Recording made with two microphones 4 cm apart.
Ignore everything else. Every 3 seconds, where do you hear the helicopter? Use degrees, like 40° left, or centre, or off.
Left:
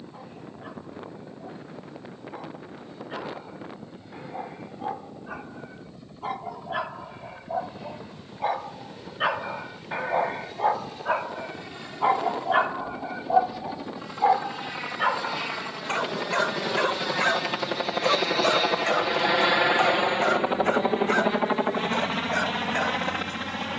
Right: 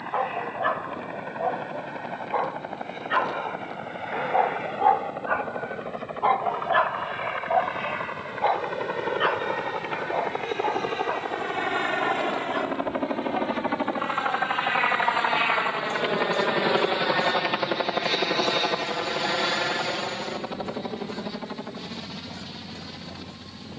70° right, 70° right, 70° right, 60° right, 50° right, 20° right, 20° left, 50° left.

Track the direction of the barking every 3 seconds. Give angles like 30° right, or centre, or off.
60° right, 50° right, 30° right, 20° left, 50° left, 60° left, 70° left, 70° left.